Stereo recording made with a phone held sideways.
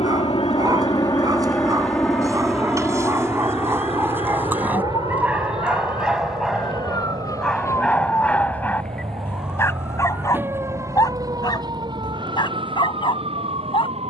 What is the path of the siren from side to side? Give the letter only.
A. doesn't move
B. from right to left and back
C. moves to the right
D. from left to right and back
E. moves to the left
C.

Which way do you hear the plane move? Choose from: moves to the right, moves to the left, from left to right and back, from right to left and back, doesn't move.
moves to the right.